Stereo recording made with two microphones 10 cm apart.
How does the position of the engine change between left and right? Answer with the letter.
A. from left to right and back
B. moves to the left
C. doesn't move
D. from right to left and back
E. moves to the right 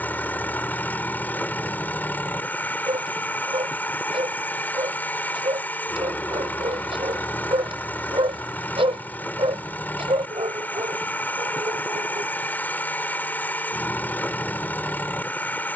C.